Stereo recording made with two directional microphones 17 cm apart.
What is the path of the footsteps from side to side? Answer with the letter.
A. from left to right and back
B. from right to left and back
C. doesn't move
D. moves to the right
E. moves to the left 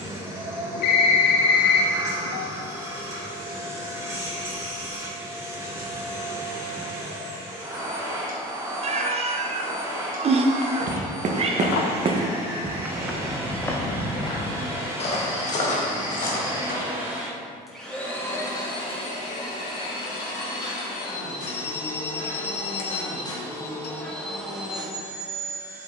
E.